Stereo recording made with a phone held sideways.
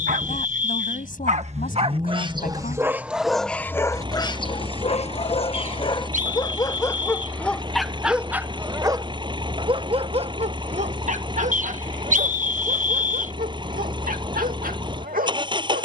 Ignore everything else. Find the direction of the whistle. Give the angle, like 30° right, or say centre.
60° right.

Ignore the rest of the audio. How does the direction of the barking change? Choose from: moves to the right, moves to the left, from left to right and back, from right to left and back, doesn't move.
from right to left and back.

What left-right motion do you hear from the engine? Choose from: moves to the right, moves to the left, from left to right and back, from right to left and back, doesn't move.
doesn't move.